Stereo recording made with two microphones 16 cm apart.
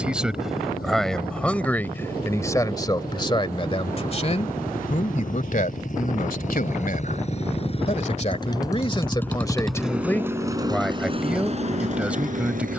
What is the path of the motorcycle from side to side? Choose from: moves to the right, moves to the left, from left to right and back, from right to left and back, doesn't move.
moves to the right.